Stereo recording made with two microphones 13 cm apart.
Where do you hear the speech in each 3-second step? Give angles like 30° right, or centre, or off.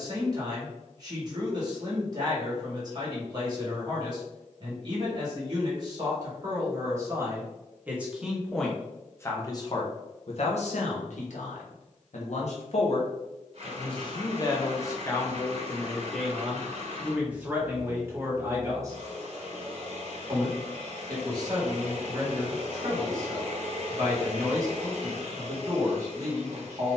30° right, 30° right, 20° right, 50° left, 40° left, centre, 20° right, 30° right, 30° right.